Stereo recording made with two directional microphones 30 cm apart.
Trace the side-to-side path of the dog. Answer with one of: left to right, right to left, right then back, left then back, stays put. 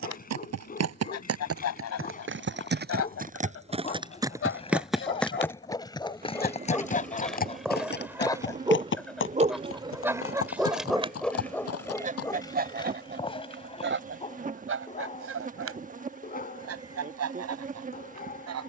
right then back.